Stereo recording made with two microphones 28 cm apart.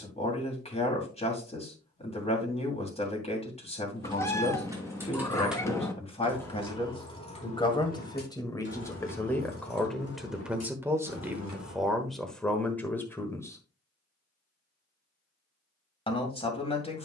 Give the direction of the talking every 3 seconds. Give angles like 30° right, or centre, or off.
20° left, 20° left, 20° left, centre, 10° left, 20° left.